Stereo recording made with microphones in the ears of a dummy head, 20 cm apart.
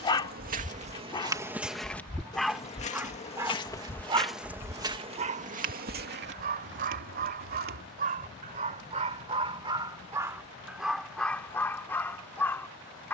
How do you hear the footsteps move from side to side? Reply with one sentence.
In this clip you hear the footsteps move from right to left and back again.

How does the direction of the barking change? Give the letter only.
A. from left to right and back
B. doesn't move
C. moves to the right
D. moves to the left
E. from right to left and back
A.